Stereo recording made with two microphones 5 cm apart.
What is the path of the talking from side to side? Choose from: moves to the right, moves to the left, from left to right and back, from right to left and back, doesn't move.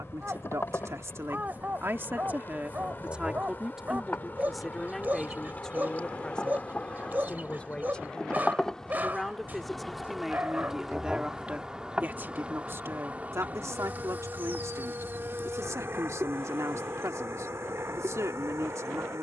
from right to left and back.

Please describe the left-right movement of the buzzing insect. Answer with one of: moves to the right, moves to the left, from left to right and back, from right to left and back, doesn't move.
moves to the right.